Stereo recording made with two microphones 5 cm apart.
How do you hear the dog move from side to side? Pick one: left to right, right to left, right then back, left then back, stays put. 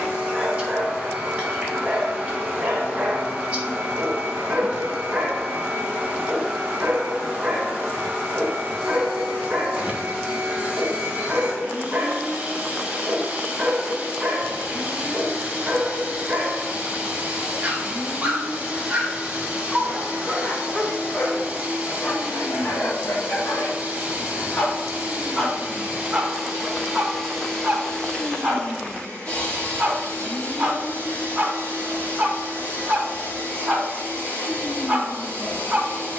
left then back.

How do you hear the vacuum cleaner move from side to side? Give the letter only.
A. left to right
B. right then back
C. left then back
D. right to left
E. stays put
D.